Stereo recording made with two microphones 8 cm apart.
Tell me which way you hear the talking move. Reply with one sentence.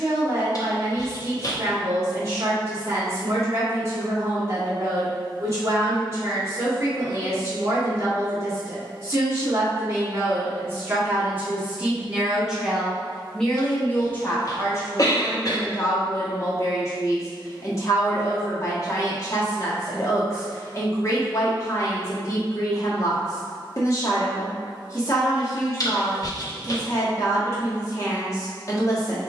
You can hear the talking move from right to left.